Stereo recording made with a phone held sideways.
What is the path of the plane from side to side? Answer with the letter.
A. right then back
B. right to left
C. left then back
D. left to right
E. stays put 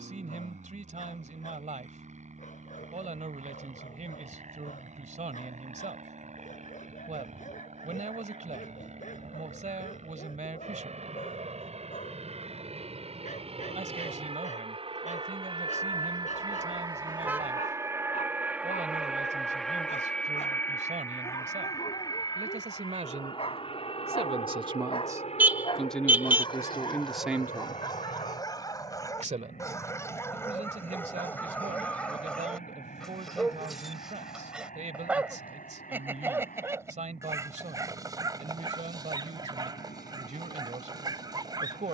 B.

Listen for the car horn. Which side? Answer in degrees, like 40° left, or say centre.
10° right.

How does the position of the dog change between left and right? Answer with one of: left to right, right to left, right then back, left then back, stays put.
left to right.